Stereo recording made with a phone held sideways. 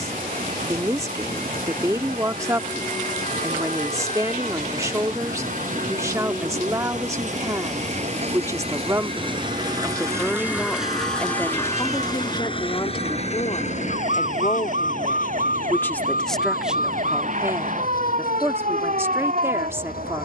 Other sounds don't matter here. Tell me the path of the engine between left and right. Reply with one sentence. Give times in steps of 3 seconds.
In this clip you hear the engine on the right from 0 s, in the centre from 9 s and on the left from 12 s.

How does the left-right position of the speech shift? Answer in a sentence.
In this clip you hear the speech move from right to left and back again.